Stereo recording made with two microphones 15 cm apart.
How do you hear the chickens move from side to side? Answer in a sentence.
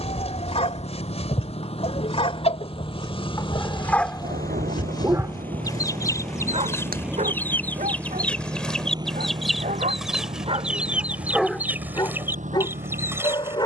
In this clip you hear the chickens travel towards the right.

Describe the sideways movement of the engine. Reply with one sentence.
In this clip you hear the engine go from the left side to the right.